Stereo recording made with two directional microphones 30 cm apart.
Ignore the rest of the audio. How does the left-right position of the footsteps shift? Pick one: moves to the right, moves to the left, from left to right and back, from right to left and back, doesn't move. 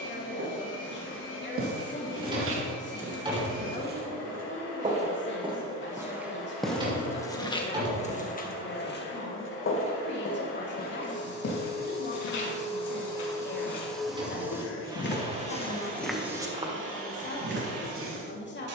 from right to left and back.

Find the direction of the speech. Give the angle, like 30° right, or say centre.
40° left.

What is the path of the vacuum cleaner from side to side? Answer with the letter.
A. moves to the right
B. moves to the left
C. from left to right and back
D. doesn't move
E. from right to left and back
A.